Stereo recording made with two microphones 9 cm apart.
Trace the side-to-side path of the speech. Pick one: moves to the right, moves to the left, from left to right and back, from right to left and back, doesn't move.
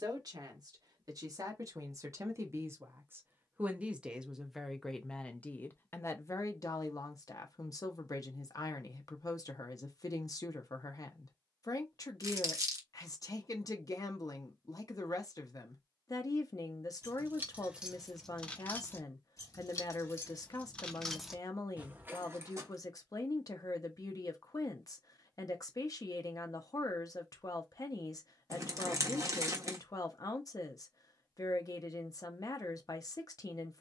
moves to the left.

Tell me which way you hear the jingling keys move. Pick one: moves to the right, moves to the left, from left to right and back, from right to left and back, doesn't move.
from right to left and back.